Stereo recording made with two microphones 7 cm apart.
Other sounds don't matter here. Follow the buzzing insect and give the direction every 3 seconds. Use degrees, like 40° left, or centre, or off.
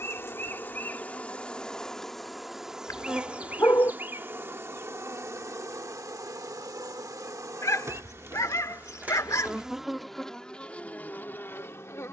10° left, 30° right, 40° right, 10° left.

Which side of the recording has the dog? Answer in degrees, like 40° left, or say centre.
40° left.